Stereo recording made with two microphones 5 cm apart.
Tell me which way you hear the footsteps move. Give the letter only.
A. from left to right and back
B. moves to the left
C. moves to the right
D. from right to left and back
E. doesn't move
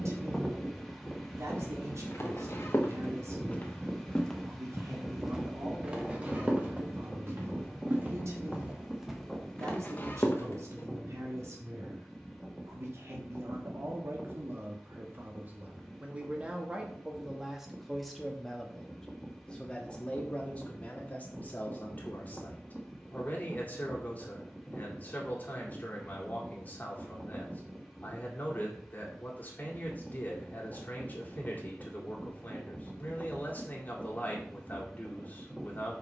A.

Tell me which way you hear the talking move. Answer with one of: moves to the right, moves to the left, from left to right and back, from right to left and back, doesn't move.
moves to the left.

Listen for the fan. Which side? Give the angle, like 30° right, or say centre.
centre.